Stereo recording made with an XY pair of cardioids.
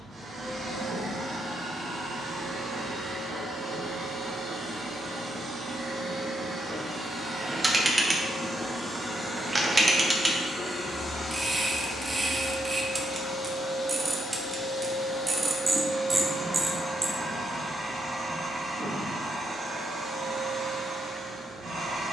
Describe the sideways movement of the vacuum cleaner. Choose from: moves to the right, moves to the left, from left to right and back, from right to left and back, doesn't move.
from right to left and back.